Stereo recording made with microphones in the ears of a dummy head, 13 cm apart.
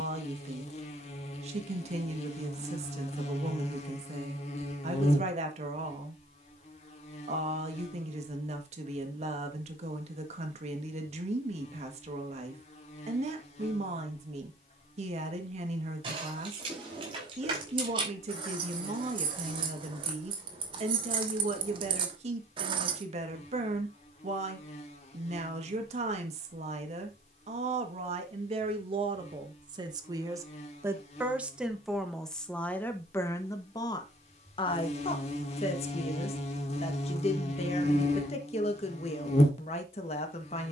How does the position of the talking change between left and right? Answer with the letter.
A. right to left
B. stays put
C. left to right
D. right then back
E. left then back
A.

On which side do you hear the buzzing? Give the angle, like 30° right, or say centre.
50° left.